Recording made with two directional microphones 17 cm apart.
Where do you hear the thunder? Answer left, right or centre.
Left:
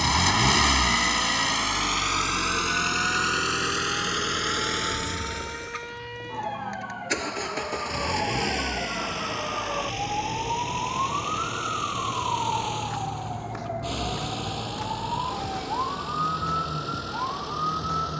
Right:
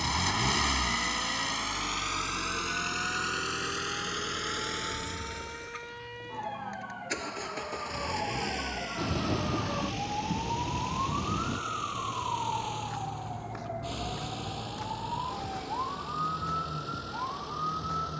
right.